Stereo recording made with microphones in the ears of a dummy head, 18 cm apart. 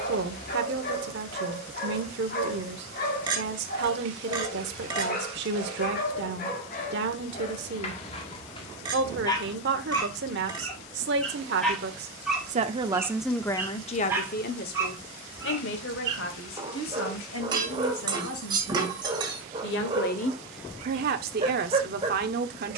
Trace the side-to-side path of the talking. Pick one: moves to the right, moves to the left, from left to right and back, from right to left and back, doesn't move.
from right to left and back.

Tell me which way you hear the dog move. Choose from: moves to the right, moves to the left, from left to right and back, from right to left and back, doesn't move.
moves to the right.